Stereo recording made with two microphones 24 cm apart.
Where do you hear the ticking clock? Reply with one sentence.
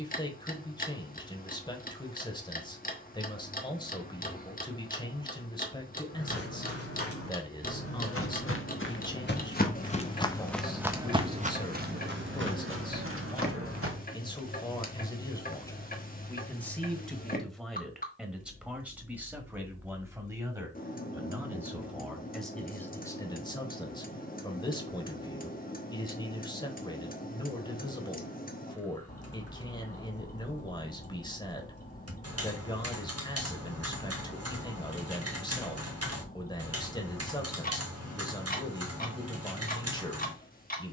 You can hear the ticking clock on the left.